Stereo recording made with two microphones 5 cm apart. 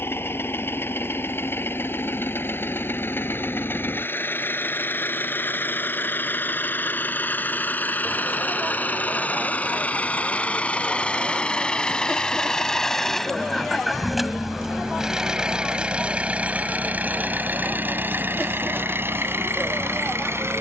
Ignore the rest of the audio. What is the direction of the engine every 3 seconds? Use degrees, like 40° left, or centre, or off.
50° left, 50° left, 40° left, 30° left, centre, 30° right, 50° right.